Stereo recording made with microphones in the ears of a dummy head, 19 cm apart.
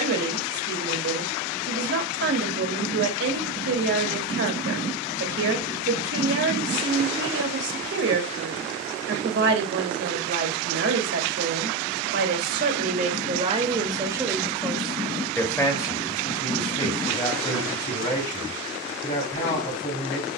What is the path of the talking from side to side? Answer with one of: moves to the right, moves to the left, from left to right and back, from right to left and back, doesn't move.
moves to the left.